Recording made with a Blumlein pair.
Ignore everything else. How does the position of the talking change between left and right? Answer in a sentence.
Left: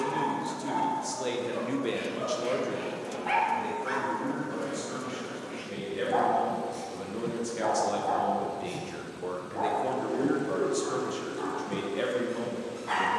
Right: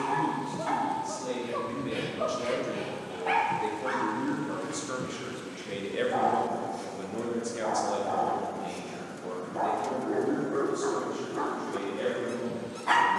You can hear the talking move from left to right and back again.